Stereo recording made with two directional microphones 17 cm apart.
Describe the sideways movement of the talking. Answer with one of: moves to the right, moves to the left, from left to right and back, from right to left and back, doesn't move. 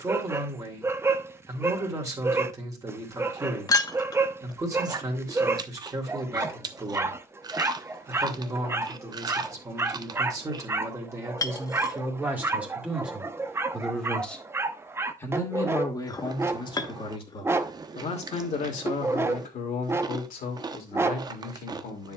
moves to the left.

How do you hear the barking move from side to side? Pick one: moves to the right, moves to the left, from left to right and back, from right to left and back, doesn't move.
doesn't move.